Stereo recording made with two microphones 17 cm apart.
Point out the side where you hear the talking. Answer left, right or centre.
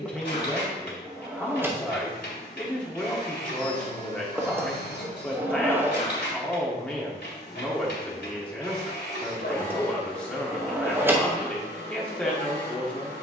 centre.